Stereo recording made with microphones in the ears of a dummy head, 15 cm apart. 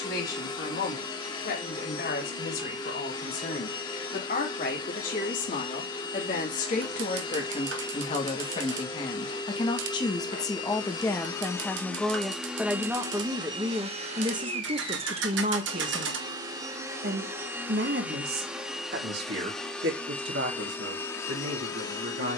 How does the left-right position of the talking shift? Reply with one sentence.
In this clip you hear the talking move from left to right.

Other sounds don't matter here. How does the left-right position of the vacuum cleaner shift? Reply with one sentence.
In this clip you hear the vacuum cleaner move from left to right and back again.